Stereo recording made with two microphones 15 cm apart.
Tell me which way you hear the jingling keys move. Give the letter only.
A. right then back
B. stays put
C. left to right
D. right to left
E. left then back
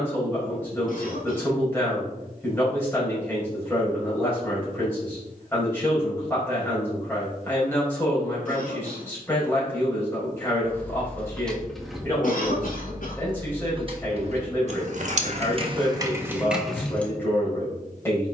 A.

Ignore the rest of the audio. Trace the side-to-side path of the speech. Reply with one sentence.
In this clip you hear the speech stay put.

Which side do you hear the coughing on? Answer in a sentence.
You can hear the coughing on the left.